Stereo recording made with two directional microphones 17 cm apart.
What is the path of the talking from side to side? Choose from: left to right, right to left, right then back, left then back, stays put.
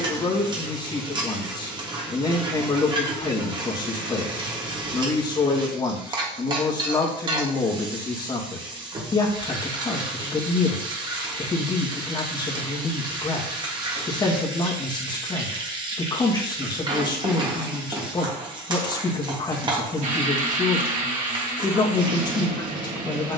stays put.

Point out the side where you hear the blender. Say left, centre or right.
right.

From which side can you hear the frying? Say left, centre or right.
right.